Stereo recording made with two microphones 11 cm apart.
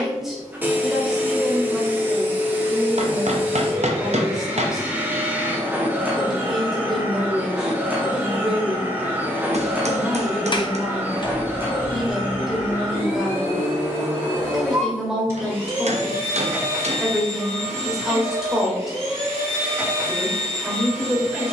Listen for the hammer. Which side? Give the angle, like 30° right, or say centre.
60° right.